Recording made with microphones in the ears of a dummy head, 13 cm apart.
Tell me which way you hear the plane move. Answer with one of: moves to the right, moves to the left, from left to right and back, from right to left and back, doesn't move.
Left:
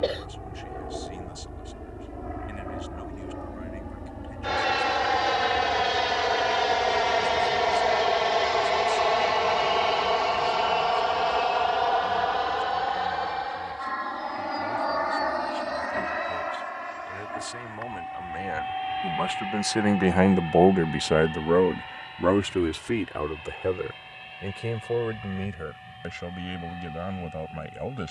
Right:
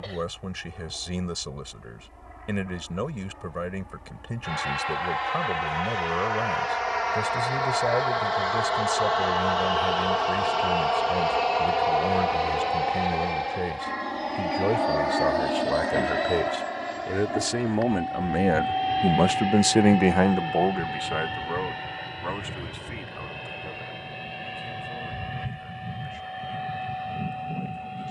moves to the right.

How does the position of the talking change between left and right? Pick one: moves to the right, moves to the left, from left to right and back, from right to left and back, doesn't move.
moves to the left.